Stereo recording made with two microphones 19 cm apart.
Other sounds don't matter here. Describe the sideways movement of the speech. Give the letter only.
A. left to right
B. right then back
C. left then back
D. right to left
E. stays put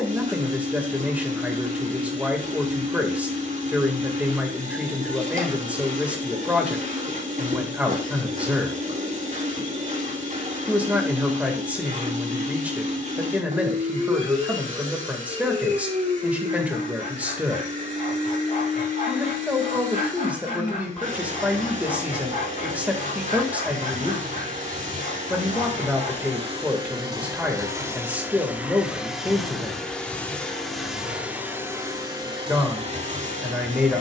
E.